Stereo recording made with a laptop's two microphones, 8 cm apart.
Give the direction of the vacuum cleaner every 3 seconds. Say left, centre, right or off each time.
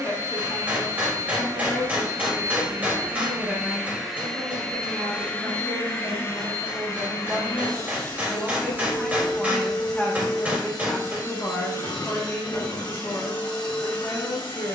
right, centre, left, left, left.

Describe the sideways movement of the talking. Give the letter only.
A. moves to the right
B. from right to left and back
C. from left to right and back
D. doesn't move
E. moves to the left
C.